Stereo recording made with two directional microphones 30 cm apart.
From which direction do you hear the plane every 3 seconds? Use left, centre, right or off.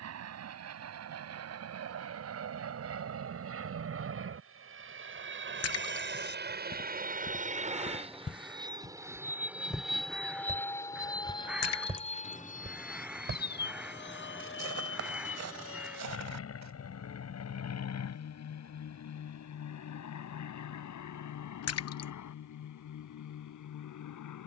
right, right, right, centre, left, left, left, left.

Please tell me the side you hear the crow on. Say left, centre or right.
centre.